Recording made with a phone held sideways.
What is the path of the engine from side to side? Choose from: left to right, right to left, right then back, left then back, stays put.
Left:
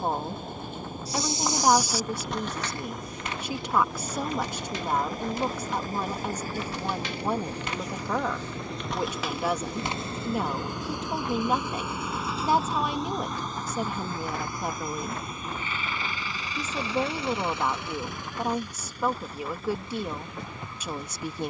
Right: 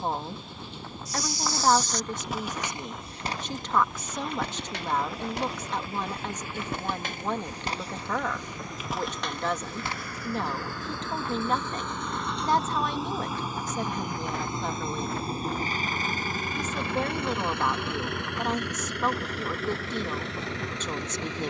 left to right.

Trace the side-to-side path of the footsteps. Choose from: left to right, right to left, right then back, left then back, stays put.
right then back.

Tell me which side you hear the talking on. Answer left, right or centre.
centre.